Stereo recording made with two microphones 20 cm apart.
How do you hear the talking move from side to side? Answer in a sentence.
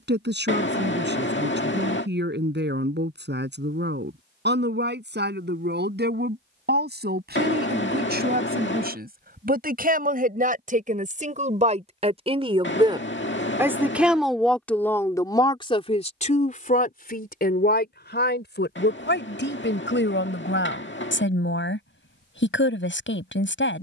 You can hear the talking go from the right side to the left.